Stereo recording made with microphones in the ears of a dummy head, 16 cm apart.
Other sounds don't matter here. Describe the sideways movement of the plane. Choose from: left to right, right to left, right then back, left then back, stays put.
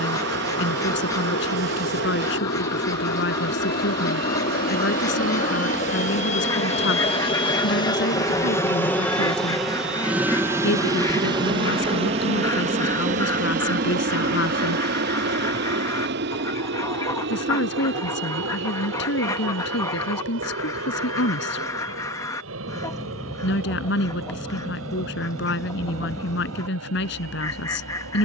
left to right.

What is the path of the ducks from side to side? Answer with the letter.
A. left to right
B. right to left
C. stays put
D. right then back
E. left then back
C.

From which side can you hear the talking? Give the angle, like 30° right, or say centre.
70° left.